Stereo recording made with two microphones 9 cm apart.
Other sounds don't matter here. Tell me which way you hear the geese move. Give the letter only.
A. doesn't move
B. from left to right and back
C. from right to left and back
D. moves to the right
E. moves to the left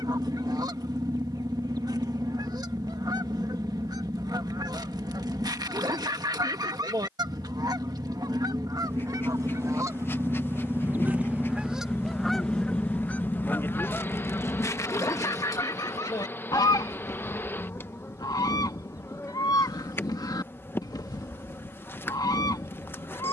E.